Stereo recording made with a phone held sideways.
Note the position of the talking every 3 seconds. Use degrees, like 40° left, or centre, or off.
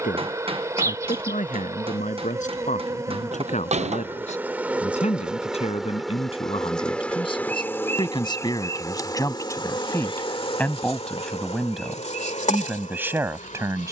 60° left, 50° left, 30° left, 10° left, 10° right.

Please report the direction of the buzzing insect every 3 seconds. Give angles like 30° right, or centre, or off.
20° right, 10° right, 10° left, 40° left, 50° left.